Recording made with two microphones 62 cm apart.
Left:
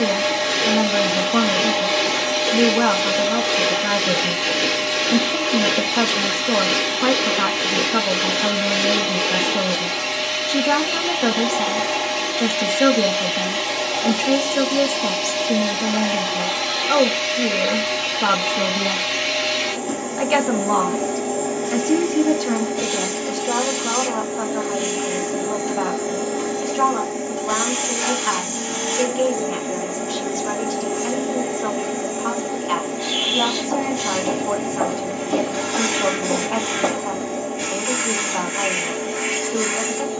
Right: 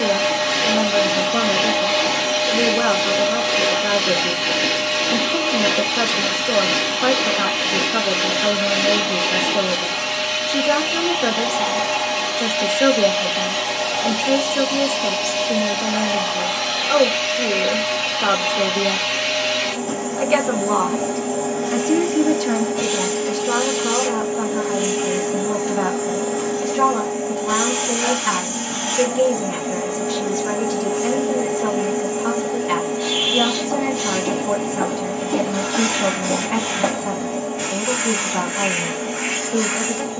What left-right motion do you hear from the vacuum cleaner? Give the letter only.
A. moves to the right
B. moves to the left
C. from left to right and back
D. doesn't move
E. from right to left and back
D.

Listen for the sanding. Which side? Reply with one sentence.
In this clip you hear the sanding on the right.